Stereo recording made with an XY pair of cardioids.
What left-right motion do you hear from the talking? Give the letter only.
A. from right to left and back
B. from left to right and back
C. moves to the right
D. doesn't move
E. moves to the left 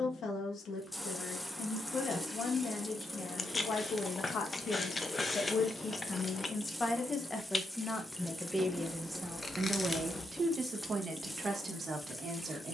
C.